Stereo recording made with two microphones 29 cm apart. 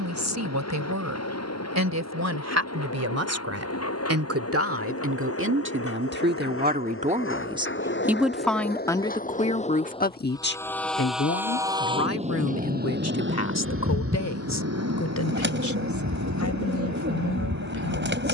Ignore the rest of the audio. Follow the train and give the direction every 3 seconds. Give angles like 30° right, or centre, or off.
60° left, 60° left, 40° left, 10° left, 40° right, 70° right.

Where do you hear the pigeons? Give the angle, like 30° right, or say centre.
40° right.